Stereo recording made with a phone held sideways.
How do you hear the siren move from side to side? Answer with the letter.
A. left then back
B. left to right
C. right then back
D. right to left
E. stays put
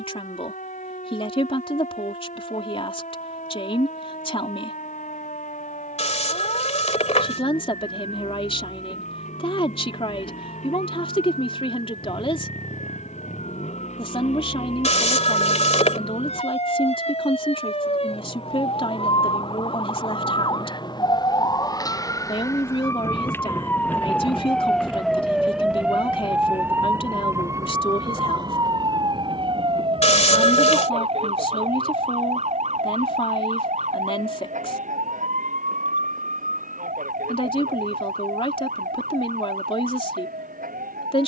B.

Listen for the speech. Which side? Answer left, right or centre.
left.